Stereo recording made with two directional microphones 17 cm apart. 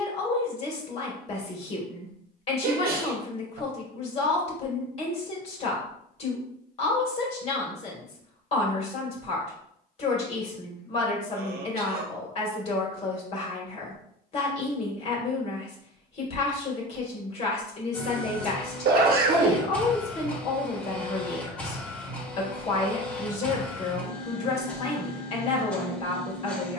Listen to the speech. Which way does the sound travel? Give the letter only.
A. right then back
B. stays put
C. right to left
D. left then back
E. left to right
B.